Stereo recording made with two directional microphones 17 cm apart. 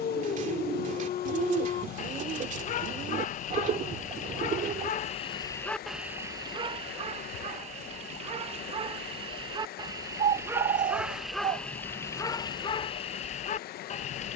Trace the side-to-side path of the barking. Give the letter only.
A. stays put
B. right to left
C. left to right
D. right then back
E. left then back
D.